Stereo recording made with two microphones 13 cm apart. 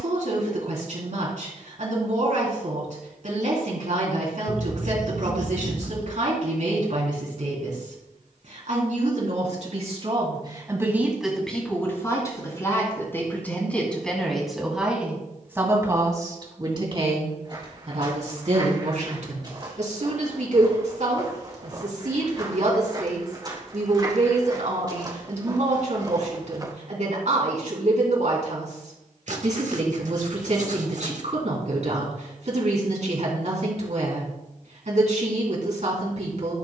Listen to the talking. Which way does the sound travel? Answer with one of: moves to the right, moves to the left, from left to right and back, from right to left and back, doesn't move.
from right to left and back.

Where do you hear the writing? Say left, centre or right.
right.